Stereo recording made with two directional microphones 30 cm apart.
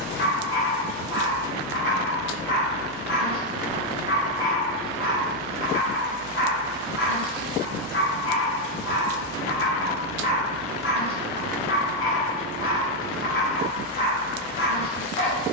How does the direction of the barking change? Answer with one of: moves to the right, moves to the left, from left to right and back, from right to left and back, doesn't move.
doesn't move.